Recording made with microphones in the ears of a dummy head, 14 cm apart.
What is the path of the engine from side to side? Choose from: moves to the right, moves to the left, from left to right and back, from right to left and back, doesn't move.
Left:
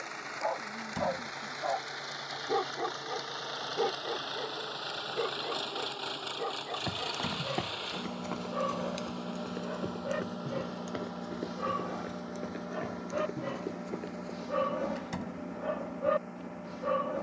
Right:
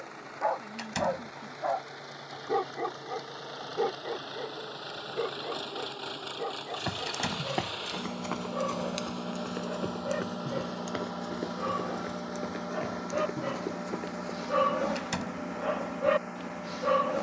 moves to the right.